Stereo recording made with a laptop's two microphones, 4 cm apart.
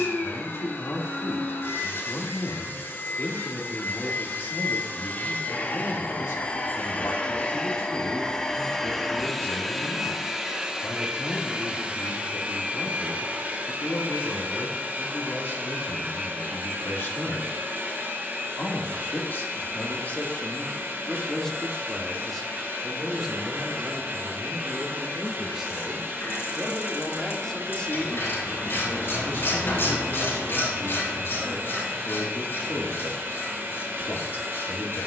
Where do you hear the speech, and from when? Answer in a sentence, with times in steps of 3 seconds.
In this clip you hear the speech on the left from 0 s, in the centre from 21 s and on the left from 27 s.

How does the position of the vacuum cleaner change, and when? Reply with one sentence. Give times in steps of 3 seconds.
In this clip you hear the vacuum cleaner on the left from 0 s, in the centre from 9 s and on the right from 12 s.